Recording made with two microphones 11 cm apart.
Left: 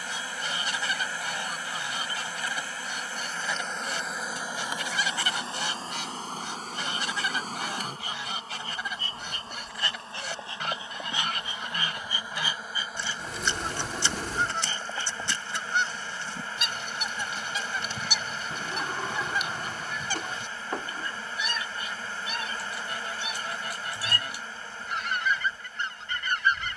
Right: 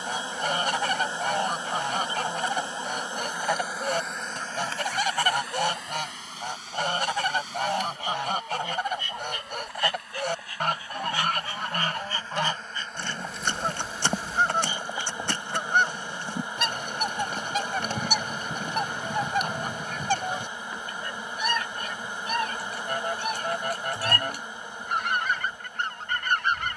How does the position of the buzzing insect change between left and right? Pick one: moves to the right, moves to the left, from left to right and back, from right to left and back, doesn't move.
from right to left and back.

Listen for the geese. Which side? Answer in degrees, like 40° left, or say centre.
50° right.